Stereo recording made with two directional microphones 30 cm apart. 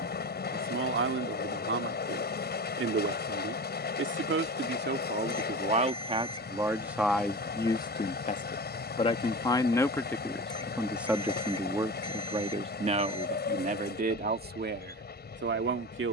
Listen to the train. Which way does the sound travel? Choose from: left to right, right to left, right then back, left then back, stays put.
stays put.